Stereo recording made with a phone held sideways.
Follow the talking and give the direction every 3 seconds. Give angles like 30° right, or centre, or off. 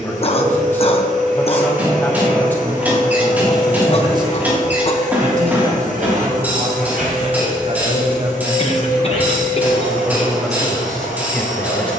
10° left, 30° right, 50° right, centre.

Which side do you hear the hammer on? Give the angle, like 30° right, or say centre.
10° right.